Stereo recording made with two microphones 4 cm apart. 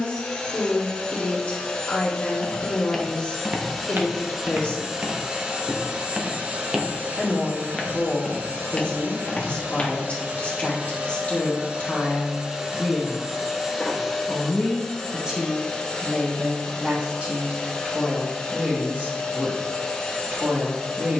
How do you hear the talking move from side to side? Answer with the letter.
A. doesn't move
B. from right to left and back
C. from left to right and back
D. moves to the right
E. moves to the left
D.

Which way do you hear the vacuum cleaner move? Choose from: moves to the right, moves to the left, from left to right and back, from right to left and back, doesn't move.
from left to right and back.